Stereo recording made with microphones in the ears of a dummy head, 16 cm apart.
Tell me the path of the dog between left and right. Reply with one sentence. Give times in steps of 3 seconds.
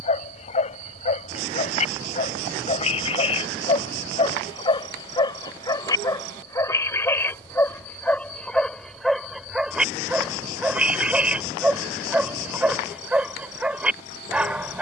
You can hear the dog on the left from 0 s and in the centre from 6 s.